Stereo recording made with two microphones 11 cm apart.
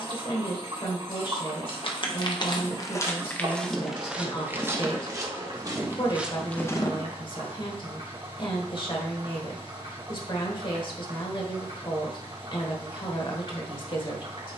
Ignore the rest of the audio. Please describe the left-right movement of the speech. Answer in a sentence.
In this clip you hear the speech stay in one place.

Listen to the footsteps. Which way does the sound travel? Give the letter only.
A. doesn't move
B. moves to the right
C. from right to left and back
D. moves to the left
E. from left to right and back
E.